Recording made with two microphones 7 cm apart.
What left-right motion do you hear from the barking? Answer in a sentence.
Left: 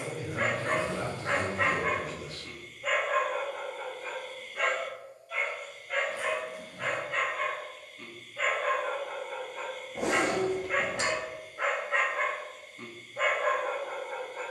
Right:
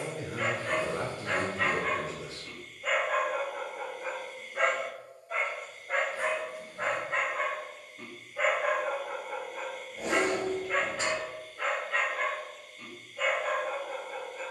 In this clip you hear the barking go right and come back.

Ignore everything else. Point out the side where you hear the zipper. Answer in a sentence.
You can hear the zipper on the left.